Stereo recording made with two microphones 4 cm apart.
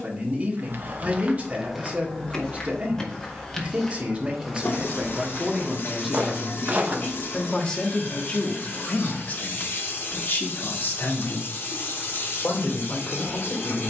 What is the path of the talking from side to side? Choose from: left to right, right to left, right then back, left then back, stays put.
right to left.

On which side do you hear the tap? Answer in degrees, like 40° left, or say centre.
60° left.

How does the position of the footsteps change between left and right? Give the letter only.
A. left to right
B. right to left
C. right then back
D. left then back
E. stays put
D.